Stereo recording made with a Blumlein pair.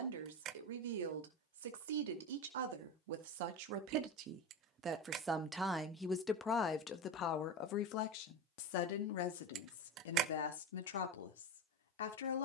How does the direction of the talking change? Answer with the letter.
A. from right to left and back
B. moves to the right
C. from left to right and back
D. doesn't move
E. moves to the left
E.